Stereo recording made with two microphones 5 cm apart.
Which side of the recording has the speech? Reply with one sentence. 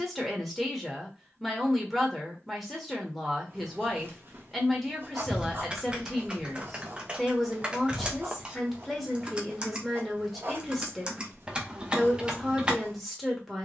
In this clip you hear the speech in the centre.